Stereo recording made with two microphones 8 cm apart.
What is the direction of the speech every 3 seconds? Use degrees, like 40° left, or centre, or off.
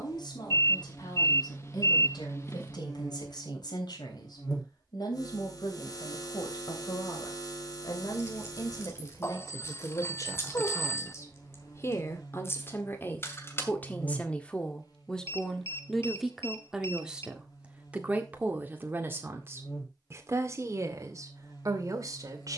70° left, 60° left, 60° left, 50° left, 20° left, centre, 30° right, 50° right.